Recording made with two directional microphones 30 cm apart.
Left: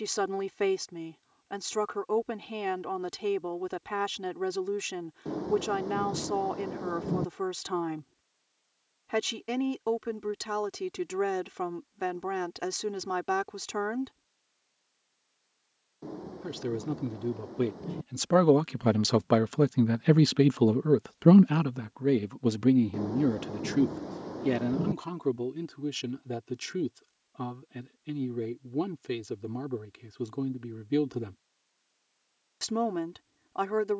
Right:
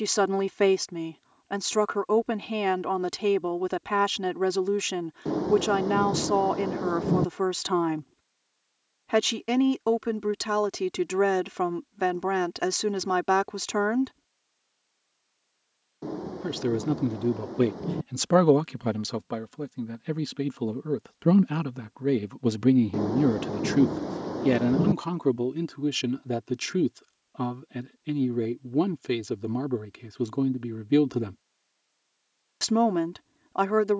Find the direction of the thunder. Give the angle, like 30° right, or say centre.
50° right.